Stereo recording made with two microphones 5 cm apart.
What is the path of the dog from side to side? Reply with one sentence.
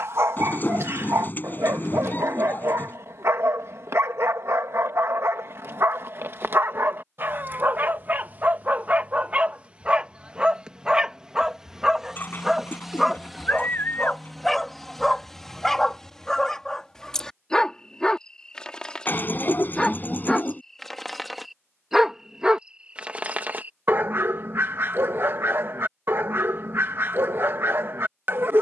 In this clip you hear the dog go left and come back.